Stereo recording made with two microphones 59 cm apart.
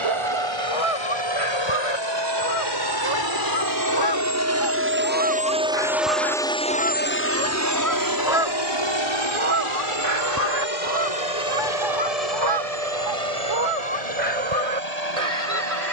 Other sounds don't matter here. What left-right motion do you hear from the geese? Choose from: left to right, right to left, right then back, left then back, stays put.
left to right.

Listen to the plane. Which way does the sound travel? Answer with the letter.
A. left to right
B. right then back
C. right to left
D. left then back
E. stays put
C.